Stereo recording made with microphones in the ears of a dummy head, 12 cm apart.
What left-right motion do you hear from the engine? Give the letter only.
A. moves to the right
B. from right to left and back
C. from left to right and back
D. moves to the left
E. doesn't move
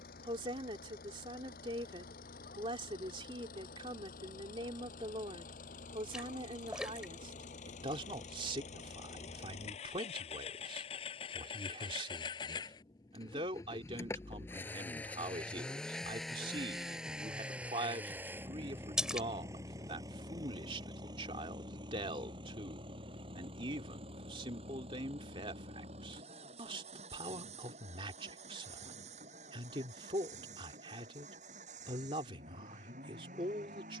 A.